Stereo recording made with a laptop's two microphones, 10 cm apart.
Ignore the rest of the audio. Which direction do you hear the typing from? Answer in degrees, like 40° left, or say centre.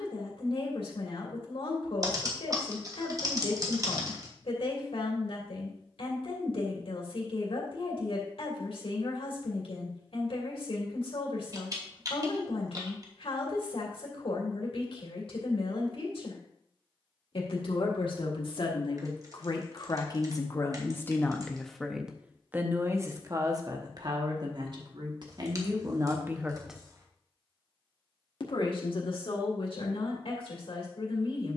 40° right.